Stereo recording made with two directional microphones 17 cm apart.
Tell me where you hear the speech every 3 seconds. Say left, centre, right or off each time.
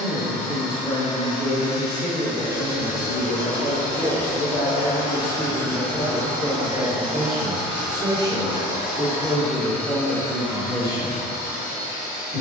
left, left, centre, right.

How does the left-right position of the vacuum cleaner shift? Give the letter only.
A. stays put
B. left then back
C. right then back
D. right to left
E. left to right
C.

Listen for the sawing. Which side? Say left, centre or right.
left.